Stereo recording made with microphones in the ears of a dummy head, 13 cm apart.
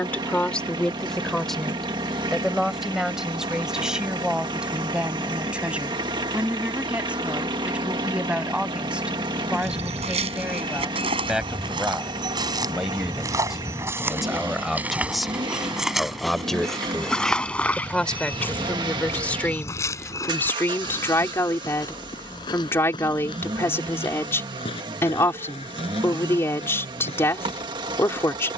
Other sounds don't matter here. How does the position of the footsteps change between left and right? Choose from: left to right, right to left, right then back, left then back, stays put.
right to left.